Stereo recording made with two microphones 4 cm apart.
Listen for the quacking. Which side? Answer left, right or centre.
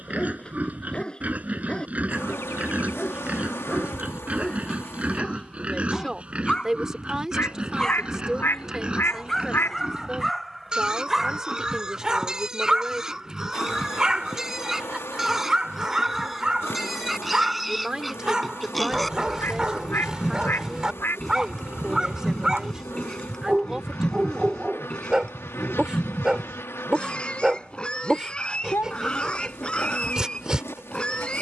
left.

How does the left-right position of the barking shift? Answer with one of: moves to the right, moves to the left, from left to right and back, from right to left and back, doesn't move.
moves to the right.